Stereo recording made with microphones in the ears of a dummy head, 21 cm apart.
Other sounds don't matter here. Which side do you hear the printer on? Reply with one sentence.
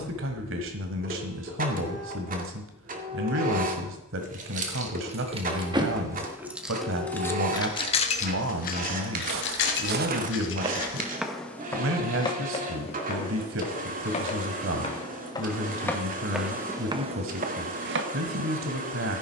In this clip you hear the printer on the right.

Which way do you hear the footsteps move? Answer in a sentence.
In this clip you hear the footsteps go left and come back.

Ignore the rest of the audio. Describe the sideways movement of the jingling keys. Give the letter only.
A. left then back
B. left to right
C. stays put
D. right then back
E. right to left
E.